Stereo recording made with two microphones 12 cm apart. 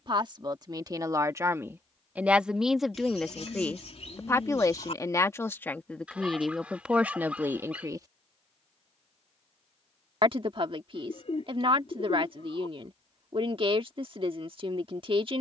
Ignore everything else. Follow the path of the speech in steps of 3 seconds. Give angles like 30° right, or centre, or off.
20° right, 20° left, 10° right, 50° right, 50° right.